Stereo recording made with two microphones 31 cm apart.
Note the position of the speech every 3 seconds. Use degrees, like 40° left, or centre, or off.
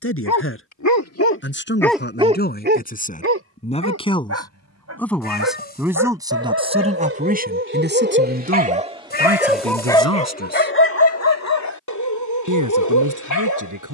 40° left, 10° left, 30° right, 50° right, 70° right.